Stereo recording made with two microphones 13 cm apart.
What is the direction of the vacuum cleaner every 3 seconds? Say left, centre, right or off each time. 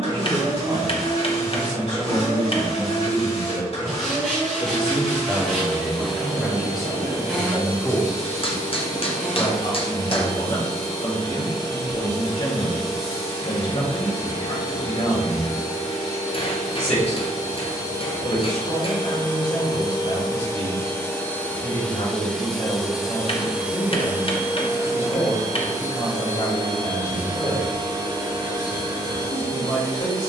left, left, left, left, left, left, left, centre, right, right.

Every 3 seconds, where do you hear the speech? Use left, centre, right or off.
right, right, centre, left, left, left, left, left, left, left.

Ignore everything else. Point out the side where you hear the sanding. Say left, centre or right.
centre.